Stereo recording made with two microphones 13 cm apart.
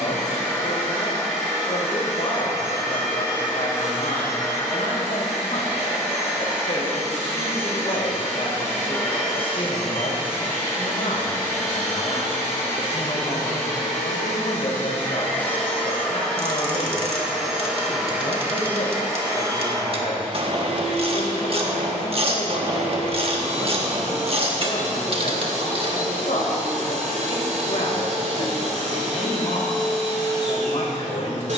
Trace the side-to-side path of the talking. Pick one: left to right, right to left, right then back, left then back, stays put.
stays put.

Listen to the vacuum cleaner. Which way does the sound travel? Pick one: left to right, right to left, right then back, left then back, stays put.
left to right.